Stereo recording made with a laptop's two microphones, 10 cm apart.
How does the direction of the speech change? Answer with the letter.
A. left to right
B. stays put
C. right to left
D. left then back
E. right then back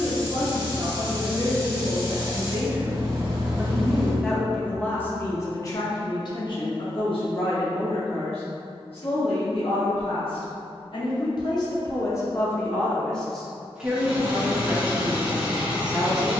D.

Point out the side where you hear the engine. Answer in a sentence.
In this clip you hear the engine in the centre.